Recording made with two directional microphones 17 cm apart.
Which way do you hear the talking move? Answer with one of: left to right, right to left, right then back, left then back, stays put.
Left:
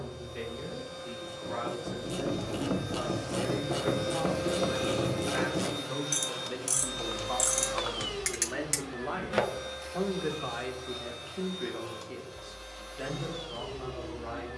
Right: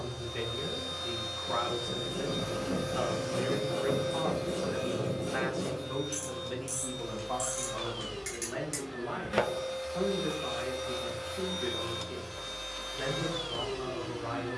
left then back.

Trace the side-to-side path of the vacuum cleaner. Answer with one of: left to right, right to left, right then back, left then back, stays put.
left then back.